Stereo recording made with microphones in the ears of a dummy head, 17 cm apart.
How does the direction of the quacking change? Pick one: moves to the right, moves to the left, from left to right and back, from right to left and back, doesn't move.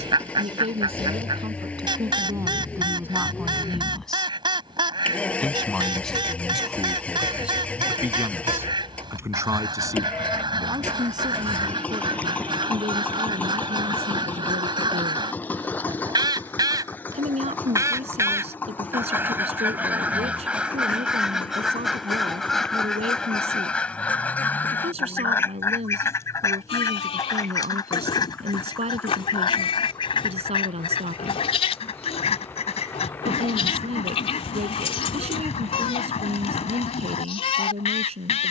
moves to the left.